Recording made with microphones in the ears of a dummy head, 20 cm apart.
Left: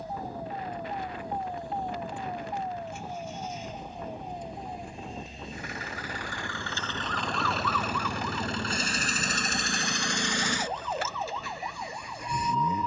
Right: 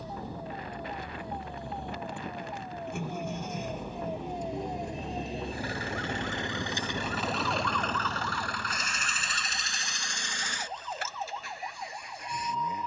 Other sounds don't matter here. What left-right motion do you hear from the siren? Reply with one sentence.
In this clip you hear the siren move to the left.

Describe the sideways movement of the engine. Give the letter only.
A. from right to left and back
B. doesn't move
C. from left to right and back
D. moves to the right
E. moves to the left
E.